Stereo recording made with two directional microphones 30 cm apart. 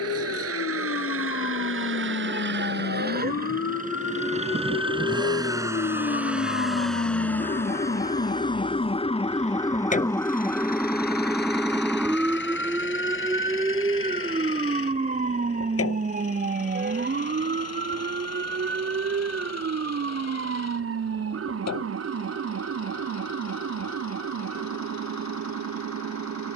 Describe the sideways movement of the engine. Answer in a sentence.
You can hear the engine move to the left.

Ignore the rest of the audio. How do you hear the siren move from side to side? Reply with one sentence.
You can hear the siren go from the left side to the right.